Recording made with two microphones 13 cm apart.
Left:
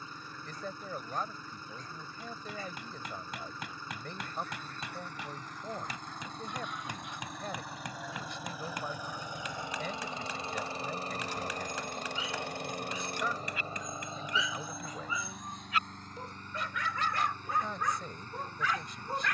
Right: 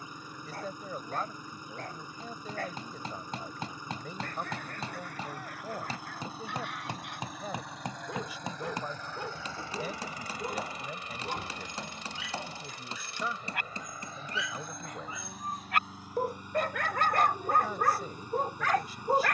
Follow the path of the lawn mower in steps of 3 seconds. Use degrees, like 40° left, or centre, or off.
20° right, 10° right, centre, 30° left, 40° left, 10° right, 10° right.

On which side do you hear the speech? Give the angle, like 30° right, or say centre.
10° right.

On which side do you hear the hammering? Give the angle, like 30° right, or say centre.
30° right.